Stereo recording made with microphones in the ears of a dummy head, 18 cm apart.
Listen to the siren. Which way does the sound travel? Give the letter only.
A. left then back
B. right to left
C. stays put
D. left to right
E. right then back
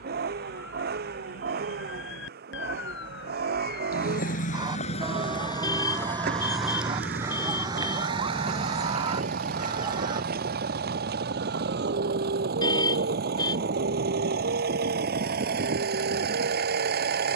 D.